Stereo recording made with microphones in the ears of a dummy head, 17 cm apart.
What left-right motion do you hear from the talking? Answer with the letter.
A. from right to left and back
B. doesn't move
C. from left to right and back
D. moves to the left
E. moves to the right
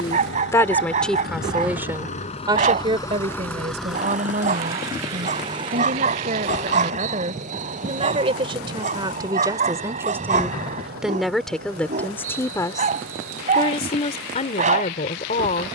C.